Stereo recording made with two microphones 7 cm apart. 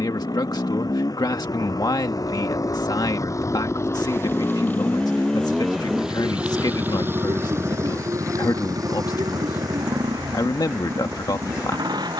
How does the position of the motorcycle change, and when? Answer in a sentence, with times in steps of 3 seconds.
In this clip you hear the motorcycle on the left from 0 s and on the right from 6 s.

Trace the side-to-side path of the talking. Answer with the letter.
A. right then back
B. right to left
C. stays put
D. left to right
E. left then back
C.